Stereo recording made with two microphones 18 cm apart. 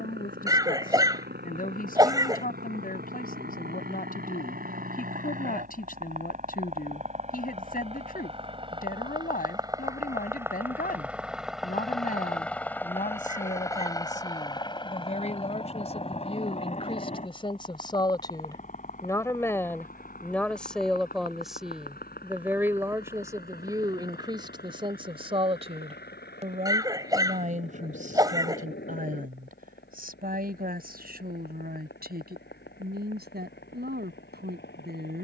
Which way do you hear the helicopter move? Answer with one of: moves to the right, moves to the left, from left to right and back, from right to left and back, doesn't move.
moves to the left.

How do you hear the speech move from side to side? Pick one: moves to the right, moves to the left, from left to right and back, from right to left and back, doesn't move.
moves to the right.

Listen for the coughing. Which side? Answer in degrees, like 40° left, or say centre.
20° right.